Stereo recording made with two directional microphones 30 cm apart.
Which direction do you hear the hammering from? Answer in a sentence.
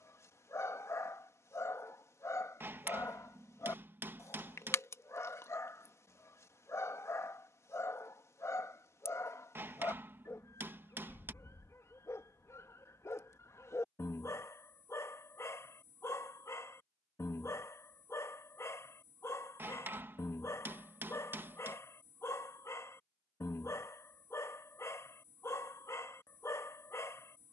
In this clip you hear the hammering in the centre.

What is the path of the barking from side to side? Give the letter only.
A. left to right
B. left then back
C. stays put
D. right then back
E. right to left
C.